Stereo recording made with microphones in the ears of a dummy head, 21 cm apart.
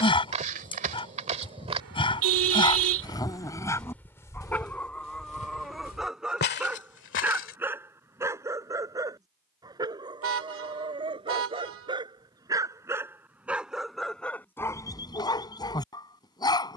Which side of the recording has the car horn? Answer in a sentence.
You can hear the car horn on the right.